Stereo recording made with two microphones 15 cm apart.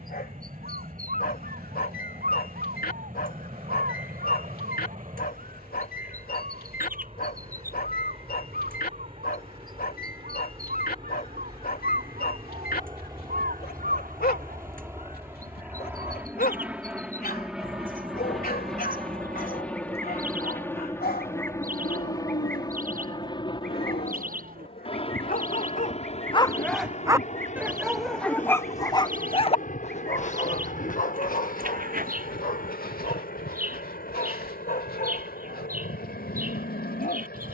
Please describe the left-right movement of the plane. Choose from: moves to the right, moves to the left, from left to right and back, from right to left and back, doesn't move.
moves to the left.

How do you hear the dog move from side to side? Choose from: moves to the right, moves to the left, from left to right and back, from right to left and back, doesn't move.
from left to right and back.